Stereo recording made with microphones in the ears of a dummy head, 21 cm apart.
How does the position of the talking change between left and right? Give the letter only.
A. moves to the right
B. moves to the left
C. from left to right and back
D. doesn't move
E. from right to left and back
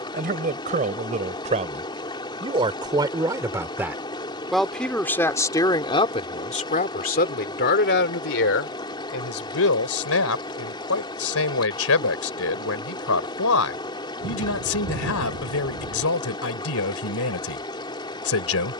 B.